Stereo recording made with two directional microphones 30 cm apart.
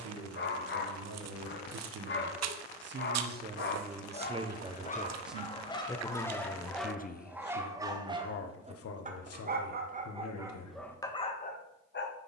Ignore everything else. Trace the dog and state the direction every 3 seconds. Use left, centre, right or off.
left, left, centre, centre.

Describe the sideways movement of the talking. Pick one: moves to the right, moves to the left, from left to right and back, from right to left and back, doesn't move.
moves to the left.